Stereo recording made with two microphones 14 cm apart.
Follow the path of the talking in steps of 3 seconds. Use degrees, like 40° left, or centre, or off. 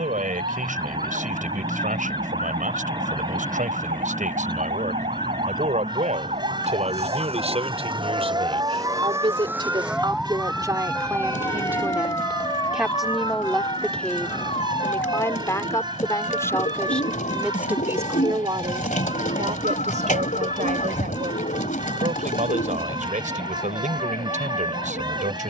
60° right, 60° right, 50° right, 20° right, centre, 10° left, 50° right, 60° right, 60° right.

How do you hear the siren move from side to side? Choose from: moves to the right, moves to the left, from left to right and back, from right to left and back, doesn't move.
moves to the left.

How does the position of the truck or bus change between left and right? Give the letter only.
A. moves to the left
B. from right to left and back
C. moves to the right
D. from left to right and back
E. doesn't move
E.